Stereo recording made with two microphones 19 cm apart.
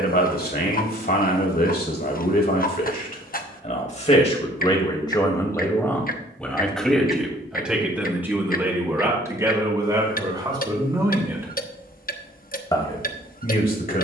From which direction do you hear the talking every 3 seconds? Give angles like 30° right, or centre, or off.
50° left, 30° left, centre, 20° right, 40° left.